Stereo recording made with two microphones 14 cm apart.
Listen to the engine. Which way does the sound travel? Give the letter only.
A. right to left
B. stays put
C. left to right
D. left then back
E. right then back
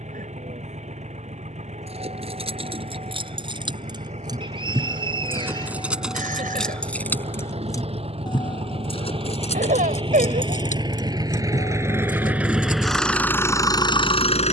A.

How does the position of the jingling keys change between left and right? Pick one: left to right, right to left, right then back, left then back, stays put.
right to left.